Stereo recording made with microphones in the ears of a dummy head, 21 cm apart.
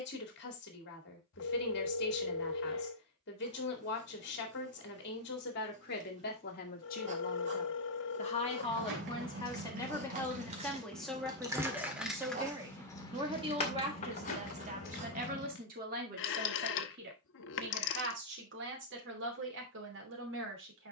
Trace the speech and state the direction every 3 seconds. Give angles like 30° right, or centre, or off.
50° left, 50° left, 30° left, 10° left, 20° right, 40° right, 50° right.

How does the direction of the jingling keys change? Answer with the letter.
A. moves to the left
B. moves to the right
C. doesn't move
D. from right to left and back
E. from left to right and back
A.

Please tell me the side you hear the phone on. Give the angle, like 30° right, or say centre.
50° left.